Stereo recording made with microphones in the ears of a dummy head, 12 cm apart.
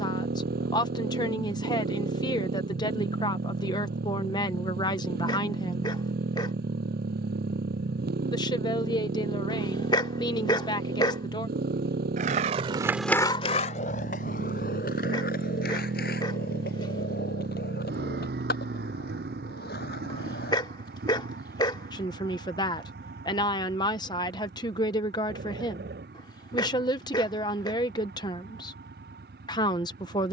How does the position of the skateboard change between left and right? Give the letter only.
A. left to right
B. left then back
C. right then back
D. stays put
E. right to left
E.